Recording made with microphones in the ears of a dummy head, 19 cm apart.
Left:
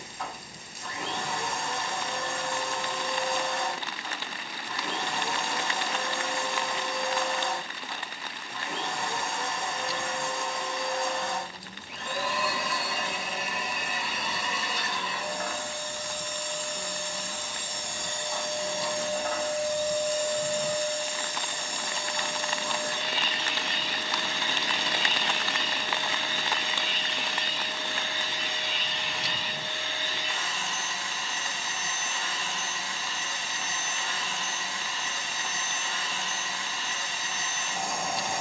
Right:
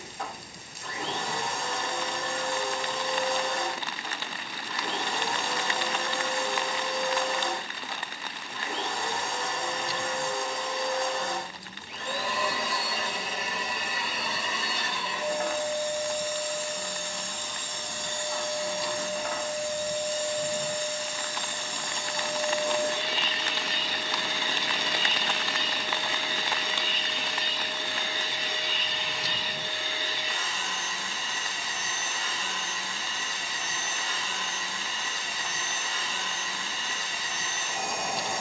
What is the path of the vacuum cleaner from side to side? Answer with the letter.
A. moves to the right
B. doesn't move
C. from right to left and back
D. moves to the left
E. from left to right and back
C.